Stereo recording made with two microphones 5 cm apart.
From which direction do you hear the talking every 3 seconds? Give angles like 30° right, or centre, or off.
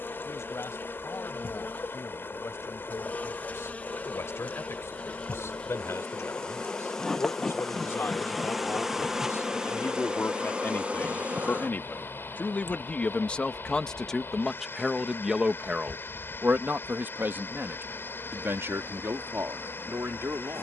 70° left, 70° left, 60° left, 50° left, 20° left, 40° right, 70° right.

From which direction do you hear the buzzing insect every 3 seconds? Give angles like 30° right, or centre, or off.
40° left, 30° left, 10° left, 20° right, 50° right, 60° right, 70° right.